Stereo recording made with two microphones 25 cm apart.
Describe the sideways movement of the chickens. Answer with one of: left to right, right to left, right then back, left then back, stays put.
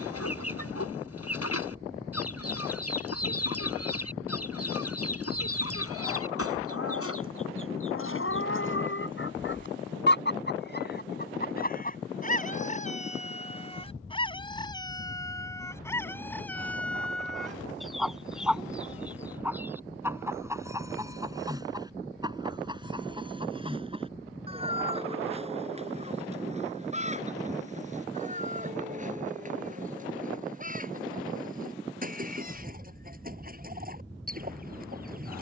left to right.